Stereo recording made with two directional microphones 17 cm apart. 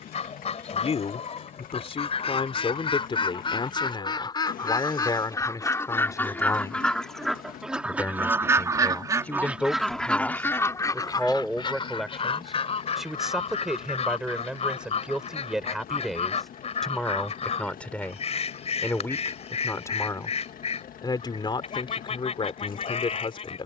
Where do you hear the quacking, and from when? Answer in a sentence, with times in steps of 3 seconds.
In this clip you hear the quacking on the left from 0 s, in the centre from 6 s and on the left from 12 s.